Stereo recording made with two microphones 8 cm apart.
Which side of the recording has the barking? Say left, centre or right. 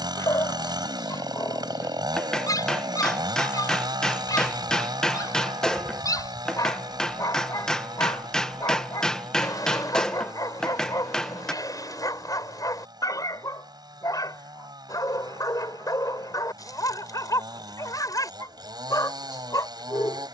left.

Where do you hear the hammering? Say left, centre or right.
centre.